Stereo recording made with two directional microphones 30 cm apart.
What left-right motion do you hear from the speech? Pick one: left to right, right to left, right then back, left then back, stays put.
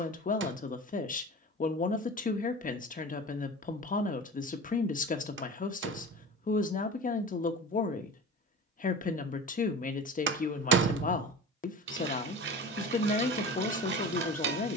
stays put.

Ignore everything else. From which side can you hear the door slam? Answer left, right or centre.
right.